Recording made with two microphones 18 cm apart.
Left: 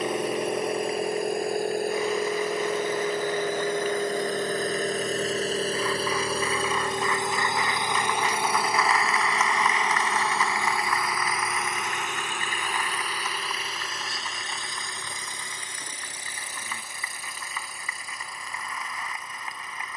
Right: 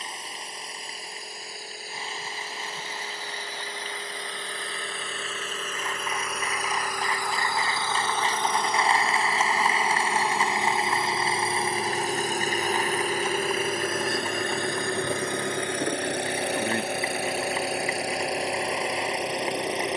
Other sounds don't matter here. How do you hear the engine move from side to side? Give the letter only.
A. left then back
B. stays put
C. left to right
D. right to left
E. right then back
C.